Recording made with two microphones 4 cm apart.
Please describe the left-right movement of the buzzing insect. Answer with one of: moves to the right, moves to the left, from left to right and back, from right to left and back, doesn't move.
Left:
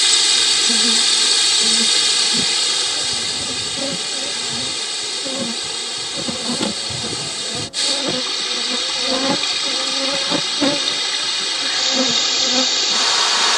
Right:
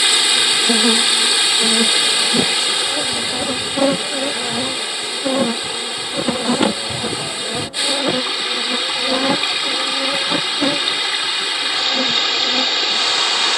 moves to the left.